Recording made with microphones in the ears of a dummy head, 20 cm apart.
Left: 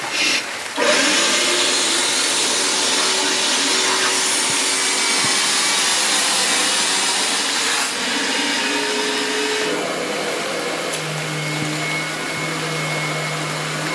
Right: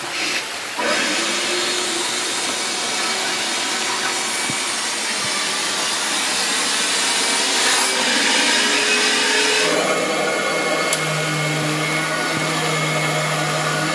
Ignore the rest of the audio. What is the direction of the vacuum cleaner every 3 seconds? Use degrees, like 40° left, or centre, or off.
50° left, 40° left, 10° right, 50° right, 50° right.